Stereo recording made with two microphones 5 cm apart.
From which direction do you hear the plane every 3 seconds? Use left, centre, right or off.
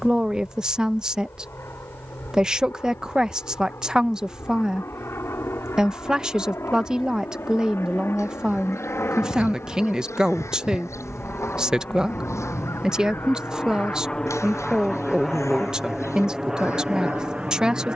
left, left, left, left, left, centre.